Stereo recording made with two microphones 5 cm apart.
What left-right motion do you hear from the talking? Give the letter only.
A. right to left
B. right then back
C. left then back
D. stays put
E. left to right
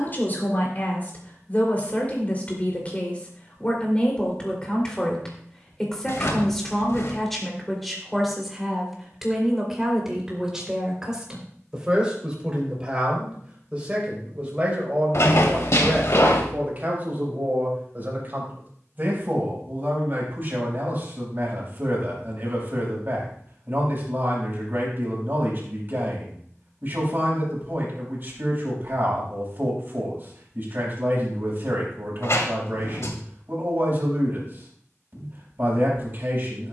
E.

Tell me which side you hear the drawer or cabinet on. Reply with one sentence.
You can hear the drawer or cabinet on the left.